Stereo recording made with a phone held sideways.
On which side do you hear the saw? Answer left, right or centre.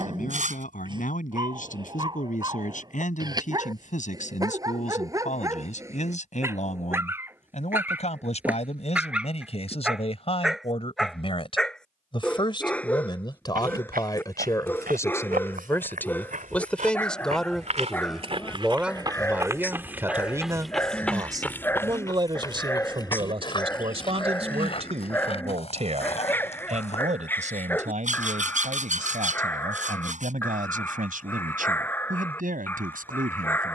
right.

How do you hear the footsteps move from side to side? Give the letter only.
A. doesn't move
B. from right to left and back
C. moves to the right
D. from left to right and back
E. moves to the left
E.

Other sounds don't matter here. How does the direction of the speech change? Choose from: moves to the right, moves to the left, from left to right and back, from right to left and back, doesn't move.
moves to the right.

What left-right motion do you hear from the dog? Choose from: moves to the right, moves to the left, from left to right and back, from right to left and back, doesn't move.
moves to the left.